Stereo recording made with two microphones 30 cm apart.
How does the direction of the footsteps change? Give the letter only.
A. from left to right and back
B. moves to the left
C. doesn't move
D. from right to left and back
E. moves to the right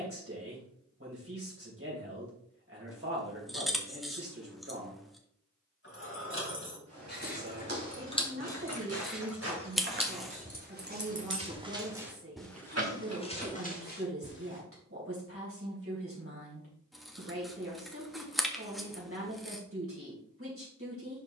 B.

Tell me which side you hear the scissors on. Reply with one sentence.
You can hear the scissors in the centre.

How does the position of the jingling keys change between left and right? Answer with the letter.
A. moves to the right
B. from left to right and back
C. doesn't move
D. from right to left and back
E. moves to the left
A.